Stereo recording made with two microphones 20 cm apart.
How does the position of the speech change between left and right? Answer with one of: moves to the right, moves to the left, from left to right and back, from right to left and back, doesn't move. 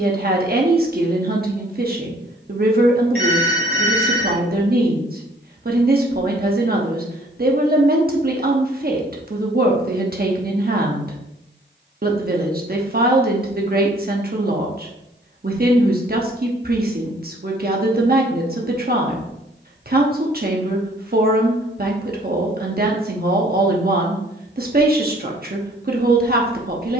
doesn't move.